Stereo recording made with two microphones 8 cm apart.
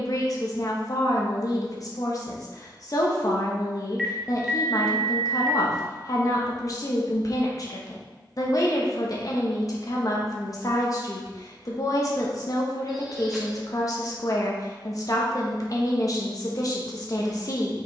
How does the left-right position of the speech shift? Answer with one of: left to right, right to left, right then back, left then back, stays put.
stays put.